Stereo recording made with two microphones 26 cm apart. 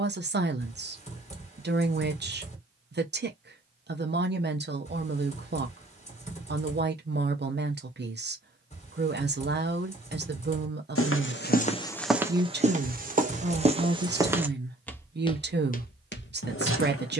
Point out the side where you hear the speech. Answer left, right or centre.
right.